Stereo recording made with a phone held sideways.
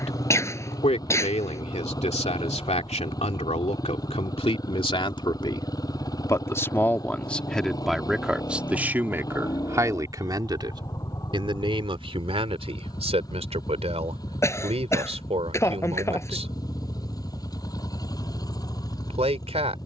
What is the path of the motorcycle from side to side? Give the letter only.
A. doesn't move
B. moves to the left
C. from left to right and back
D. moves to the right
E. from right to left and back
A.